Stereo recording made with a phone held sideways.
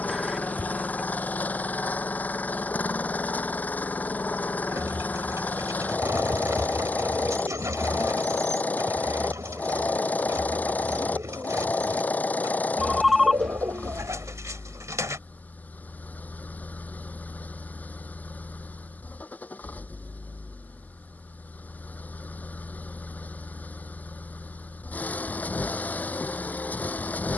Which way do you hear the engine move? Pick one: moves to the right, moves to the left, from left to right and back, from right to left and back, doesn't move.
doesn't move.